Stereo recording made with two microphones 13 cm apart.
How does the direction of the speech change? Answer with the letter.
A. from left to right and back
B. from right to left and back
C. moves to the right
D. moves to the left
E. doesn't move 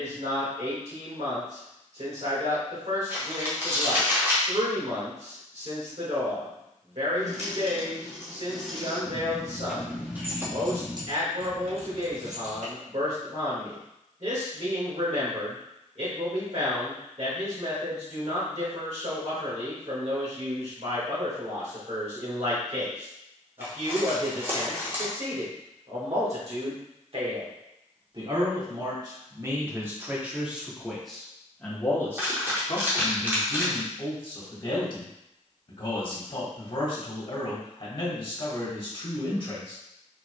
D.